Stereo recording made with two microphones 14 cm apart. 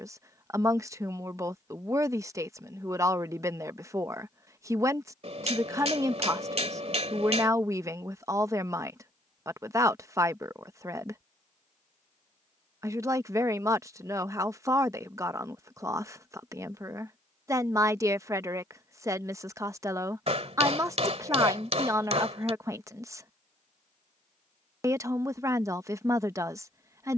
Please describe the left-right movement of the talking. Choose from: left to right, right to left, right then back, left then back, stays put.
stays put.